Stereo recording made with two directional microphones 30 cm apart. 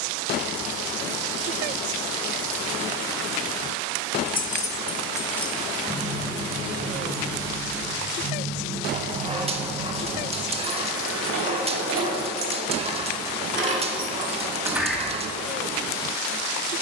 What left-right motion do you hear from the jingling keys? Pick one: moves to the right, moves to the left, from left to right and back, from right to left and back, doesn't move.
from left to right and back.